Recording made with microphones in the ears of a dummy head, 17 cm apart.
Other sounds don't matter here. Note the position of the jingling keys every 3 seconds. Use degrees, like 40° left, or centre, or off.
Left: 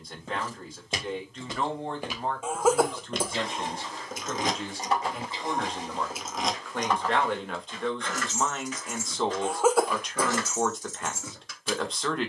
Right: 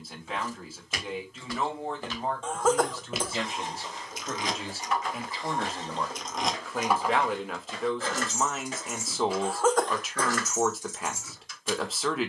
off, 30° left, 10° right, 30° left.